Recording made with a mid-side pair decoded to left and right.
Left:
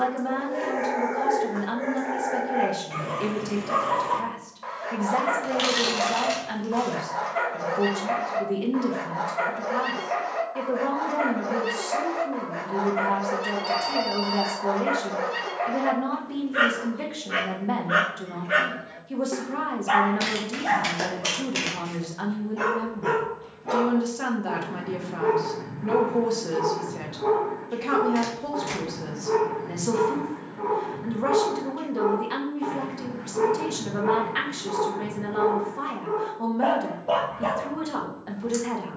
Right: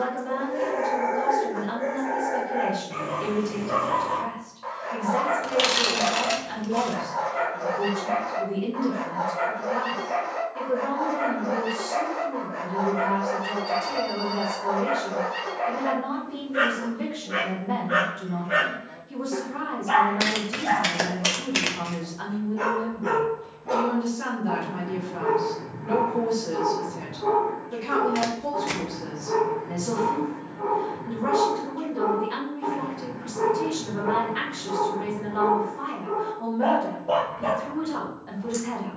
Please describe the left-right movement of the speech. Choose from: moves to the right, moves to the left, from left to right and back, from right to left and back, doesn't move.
doesn't move.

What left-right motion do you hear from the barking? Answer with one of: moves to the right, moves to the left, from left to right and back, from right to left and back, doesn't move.
doesn't move.